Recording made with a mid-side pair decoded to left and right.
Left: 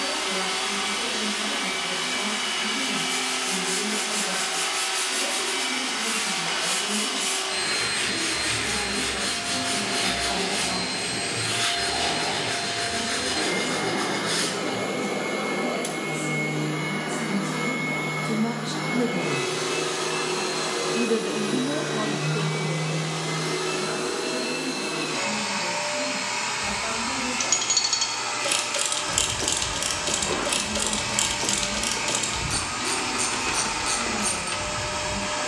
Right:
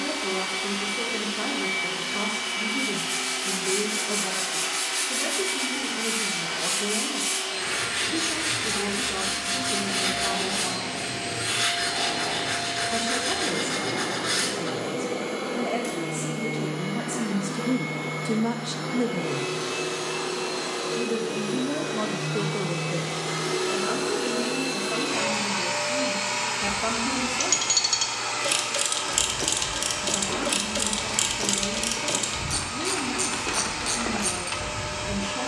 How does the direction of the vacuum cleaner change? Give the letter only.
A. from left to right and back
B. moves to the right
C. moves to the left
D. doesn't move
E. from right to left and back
A.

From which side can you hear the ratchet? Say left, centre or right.
centre.